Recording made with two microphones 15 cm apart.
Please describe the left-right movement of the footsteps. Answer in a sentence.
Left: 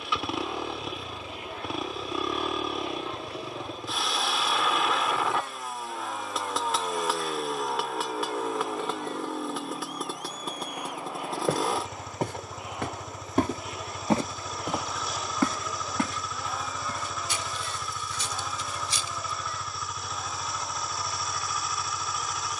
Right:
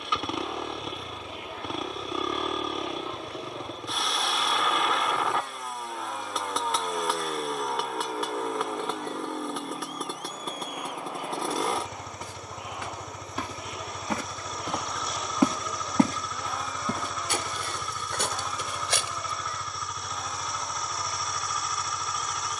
In this clip you hear the footsteps move to the right.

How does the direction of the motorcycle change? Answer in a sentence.
You can hear the motorcycle stay in one place.